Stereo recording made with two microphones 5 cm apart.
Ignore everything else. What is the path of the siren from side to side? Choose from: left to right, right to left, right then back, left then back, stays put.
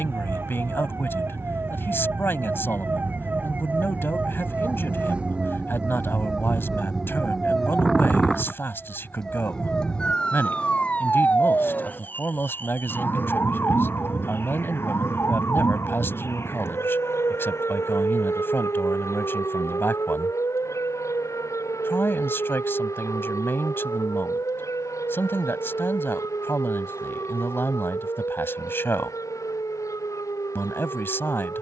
right to left.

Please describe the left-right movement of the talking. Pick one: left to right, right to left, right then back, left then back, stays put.
stays put.